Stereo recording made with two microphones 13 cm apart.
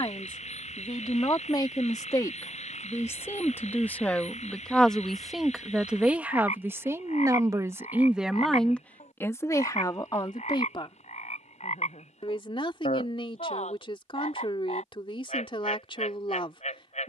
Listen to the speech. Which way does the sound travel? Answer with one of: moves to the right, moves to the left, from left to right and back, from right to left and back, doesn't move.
from left to right and back.